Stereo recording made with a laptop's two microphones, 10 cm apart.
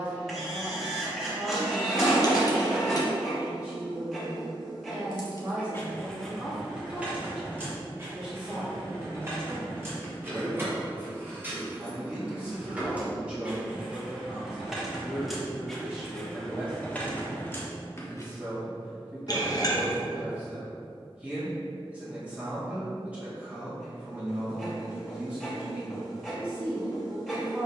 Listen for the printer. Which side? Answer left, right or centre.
centre.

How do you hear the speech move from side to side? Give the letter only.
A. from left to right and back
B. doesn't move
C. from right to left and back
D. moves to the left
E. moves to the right
B.